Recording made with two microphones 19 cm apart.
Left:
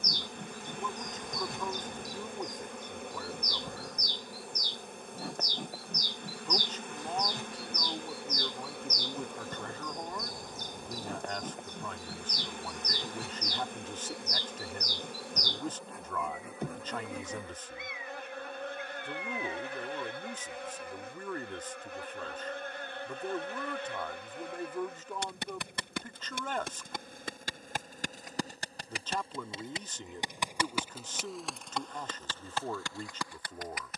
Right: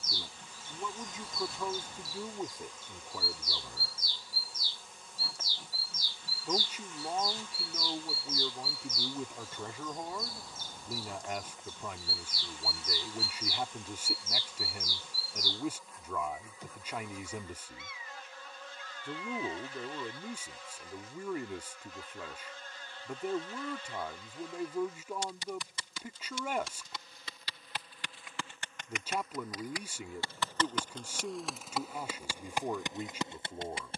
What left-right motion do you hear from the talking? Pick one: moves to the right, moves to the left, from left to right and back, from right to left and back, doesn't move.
doesn't move.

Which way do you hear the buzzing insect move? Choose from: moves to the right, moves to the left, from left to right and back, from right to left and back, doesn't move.
moves to the right.